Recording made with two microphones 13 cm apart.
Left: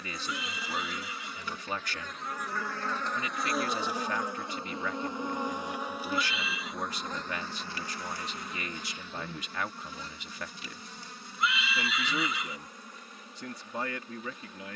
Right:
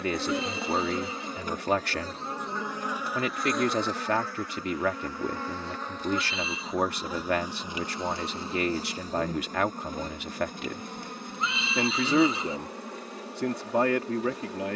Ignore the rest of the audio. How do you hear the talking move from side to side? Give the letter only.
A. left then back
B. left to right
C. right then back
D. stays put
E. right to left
D.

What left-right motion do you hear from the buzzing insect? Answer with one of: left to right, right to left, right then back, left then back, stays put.
left then back.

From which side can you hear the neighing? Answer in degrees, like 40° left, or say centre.
30° right.